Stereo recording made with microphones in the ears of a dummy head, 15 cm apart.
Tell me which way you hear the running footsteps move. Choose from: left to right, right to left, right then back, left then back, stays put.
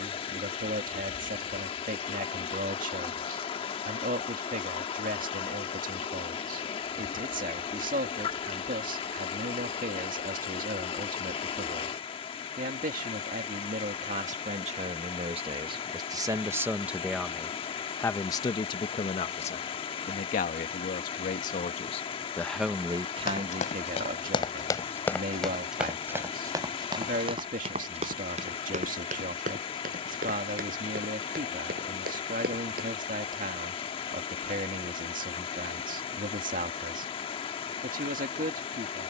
left to right.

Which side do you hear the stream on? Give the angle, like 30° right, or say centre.
30° left.